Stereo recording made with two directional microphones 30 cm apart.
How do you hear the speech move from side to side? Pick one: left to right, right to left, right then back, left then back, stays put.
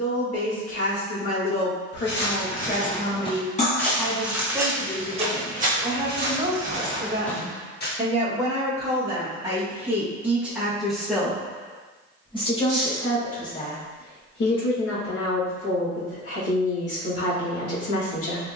right then back.